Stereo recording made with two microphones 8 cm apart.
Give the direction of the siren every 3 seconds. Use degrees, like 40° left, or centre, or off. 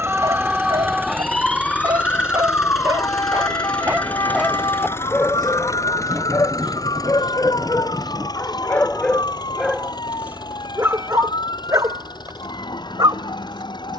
10° left, 60° left, 70° left, 80° left, 80° left.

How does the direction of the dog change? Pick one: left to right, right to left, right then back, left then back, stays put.
left then back.